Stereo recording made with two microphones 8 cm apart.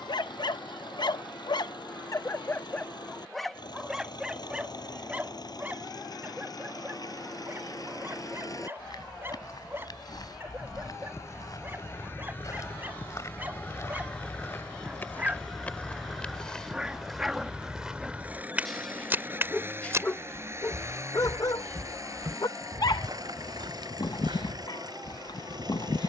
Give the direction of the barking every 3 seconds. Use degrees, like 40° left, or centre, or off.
50° left, 10° right, 20° right, 20° right, 20° right, 10° right, 20° left, 50° left, 50° left.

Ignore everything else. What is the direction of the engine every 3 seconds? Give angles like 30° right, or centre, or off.
60° left, 50° left, 40° left, 30° left, 20° left, 10° right, 30° right, 40° right, 50° right.